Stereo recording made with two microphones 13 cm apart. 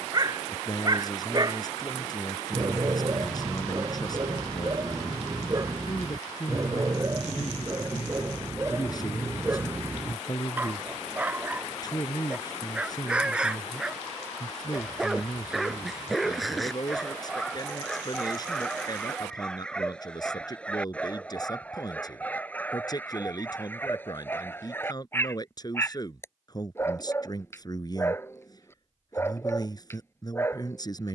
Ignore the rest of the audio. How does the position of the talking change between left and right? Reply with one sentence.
In this clip you hear the talking stay put.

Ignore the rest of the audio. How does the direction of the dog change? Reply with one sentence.
In this clip you hear the dog travel towards the left.